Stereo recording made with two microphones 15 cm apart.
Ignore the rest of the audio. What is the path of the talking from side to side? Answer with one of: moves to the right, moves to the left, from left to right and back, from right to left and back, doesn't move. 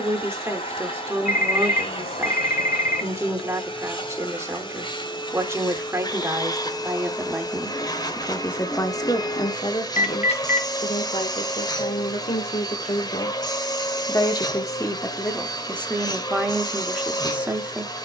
from right to left and back.